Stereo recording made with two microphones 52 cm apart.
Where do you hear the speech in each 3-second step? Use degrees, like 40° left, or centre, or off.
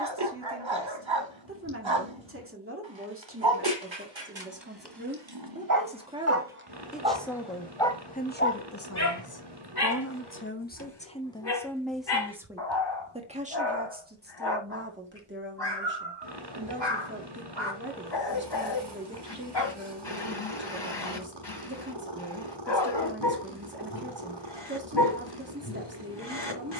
20° right, 20° right, 10° left, 20° left, 10° right, 20° right, 20° right, 20° right, 20° right.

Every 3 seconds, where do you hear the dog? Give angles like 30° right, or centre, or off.
60° right, 50° right, centre, 50° left, 50° left, 50° left, 50° left, 50° left, 50° left.